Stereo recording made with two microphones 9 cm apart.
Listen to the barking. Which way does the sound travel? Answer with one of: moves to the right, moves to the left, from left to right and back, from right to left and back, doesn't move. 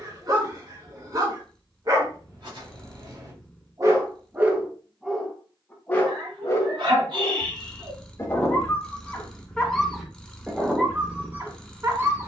from right to left and back.